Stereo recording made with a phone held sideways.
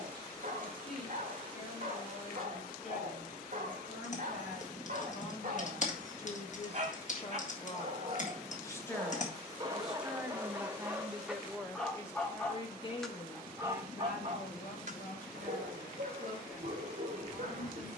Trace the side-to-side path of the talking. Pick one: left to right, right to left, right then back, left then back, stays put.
right then back.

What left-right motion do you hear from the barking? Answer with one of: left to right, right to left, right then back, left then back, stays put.
left then back.